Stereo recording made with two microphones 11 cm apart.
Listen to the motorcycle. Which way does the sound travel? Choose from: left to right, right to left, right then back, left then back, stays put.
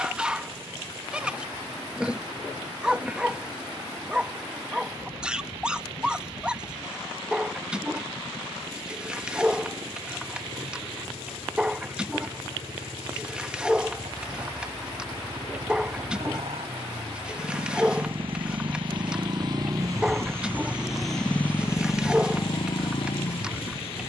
right to left.